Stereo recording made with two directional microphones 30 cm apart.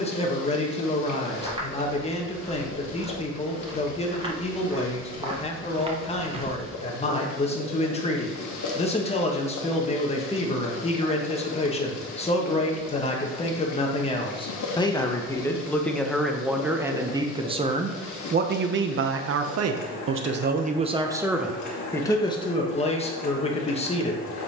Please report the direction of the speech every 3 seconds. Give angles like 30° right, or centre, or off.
20° left, 20° left, 20° left, 20° left, 20° left, centre, 40° right, 10° left.